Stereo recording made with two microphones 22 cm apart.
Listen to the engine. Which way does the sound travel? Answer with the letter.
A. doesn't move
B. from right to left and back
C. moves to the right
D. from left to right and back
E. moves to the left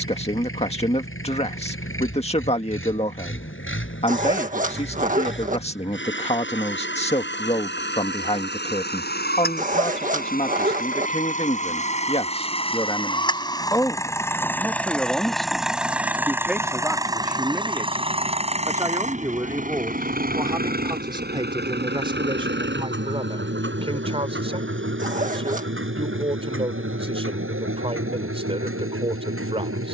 C.